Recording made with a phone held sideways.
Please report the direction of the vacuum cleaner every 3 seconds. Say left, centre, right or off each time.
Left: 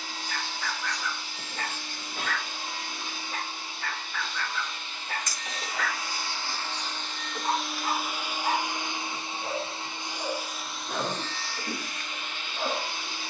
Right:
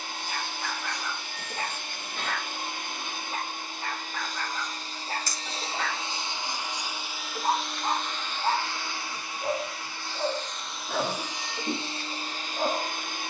right, right, centre, centre, right.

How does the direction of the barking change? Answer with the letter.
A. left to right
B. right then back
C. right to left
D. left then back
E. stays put
E.